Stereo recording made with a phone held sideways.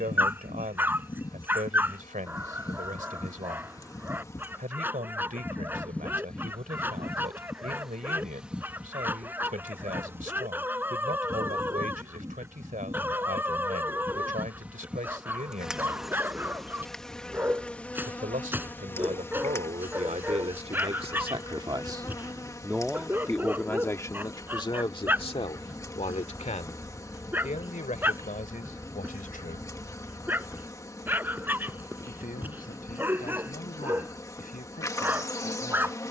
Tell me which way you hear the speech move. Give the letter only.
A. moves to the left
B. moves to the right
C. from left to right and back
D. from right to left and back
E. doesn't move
A.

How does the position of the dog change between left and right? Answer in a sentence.
In this clip you hear the dog stay in one place.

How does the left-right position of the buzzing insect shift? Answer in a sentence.
In this clip you hear the buzzing insect go right and come back.